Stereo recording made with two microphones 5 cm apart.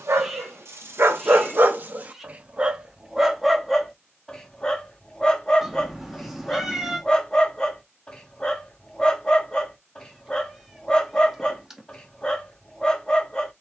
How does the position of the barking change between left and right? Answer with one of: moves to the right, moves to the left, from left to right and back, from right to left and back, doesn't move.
moves to the left.